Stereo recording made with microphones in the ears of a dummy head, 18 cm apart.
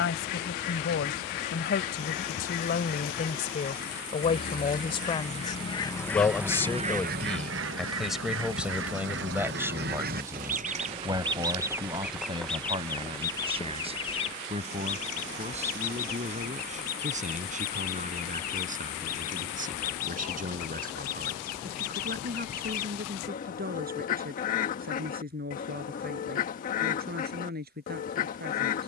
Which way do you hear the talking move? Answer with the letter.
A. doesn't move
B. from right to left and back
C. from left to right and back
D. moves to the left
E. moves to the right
E.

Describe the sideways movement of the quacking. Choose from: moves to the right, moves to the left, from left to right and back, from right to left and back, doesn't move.
from left to right and back.